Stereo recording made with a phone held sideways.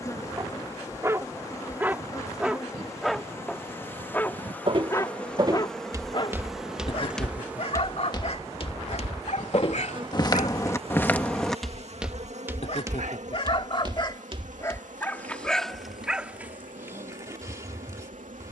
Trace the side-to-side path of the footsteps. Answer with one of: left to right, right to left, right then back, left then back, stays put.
left then back.